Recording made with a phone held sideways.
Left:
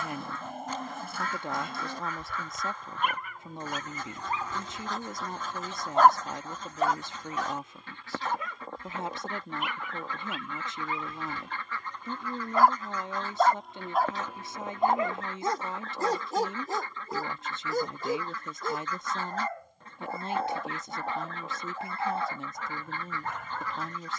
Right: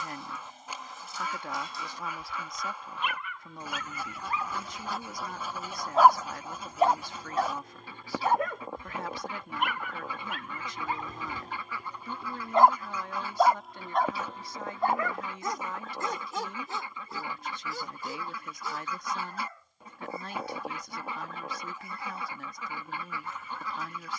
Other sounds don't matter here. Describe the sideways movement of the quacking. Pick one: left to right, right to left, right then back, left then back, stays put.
stays put.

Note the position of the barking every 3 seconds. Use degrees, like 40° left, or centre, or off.
60° left, 30° left, 40° right, 50° right, centre, 40° left, 60° left, 60° left.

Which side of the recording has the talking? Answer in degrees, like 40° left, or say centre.
20° left.